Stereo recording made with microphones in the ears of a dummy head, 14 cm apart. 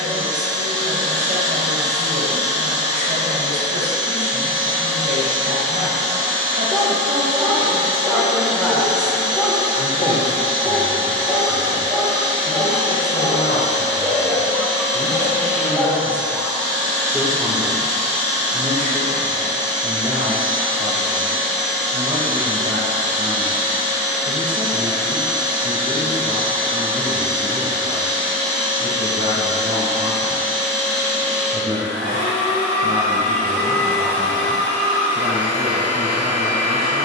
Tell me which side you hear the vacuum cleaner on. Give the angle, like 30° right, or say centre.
50° right.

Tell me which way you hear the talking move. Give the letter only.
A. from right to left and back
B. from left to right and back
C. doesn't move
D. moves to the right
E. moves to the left
A.